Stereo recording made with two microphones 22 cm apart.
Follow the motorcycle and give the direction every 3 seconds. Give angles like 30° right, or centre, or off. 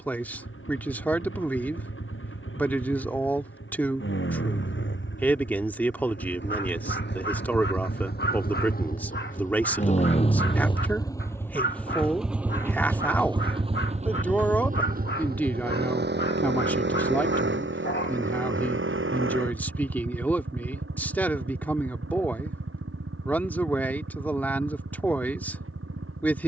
70° left, 60° left, 50° left, 20° left, 20° right, 50° right, 70° right, 70° right, 80° right.